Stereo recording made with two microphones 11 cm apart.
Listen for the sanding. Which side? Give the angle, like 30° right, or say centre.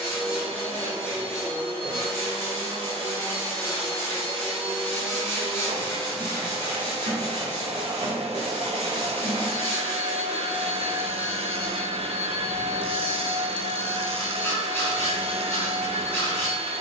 20° left.